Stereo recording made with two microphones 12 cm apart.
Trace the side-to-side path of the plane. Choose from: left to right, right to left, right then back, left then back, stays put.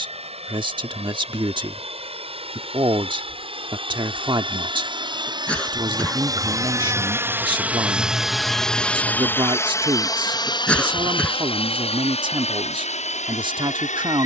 right to left.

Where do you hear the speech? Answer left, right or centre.
right.